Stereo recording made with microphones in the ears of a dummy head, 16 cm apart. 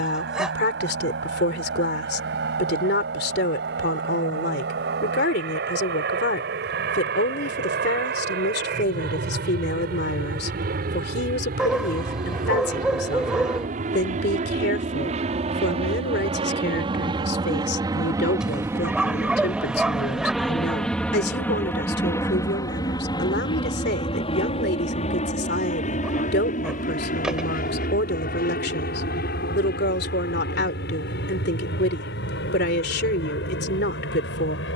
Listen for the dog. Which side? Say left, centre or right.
centre.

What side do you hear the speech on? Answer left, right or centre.
left.